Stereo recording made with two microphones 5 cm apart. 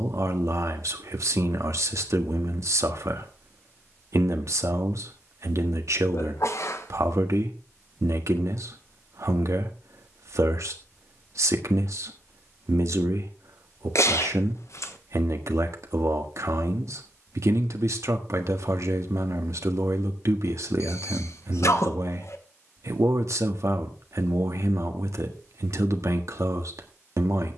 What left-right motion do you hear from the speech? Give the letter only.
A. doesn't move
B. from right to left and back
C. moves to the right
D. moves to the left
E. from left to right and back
A.